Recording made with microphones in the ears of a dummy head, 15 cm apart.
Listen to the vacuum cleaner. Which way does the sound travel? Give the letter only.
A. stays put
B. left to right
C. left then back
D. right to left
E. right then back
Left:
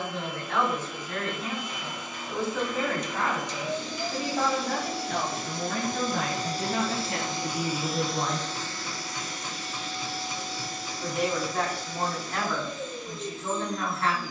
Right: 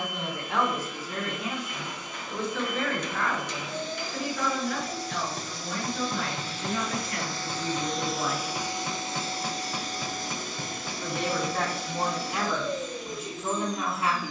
B.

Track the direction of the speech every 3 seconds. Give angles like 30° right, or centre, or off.
10° right, 40° left, 60° left, centre, 10° right.